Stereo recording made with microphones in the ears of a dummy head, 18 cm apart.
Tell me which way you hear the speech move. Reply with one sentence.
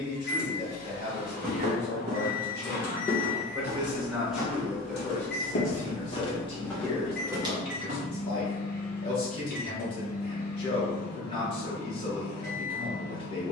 In this clip you hear the speech move from right to left.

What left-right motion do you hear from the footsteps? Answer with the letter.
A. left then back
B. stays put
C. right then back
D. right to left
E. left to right
A.